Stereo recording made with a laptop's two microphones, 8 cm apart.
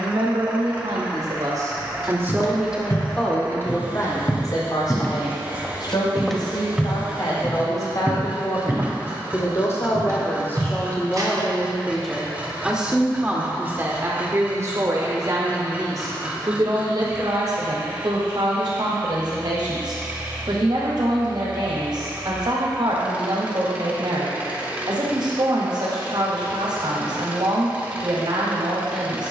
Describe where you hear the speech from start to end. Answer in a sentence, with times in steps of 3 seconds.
In this clip you hear the speech on the right from 0 s, on the left from 3 s and on the right from 12 s.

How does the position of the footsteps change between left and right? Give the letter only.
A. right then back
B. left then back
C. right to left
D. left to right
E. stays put
D.